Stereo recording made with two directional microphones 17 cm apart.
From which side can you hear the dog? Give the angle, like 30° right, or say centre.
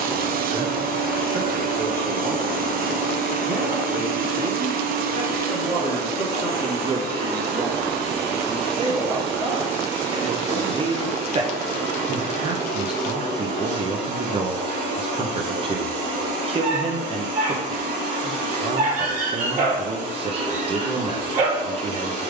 50° right.